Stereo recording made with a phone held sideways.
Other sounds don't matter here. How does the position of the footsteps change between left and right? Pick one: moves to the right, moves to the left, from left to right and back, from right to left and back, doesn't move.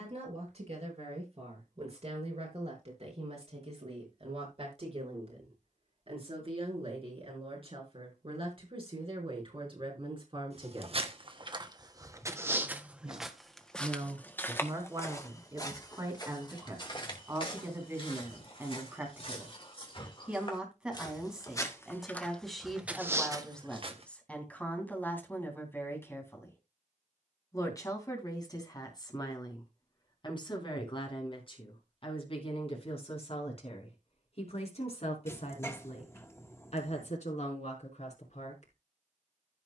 from right to left and back.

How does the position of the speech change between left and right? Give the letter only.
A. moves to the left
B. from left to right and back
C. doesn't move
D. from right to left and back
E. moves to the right
A.